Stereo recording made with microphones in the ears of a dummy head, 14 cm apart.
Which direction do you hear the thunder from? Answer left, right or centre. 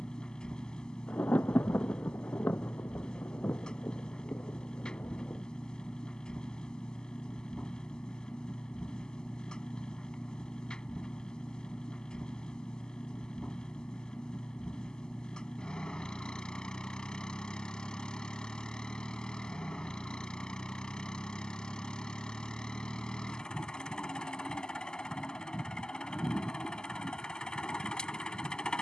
centre.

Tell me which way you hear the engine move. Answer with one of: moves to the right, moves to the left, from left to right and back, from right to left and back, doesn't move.
doesn't move.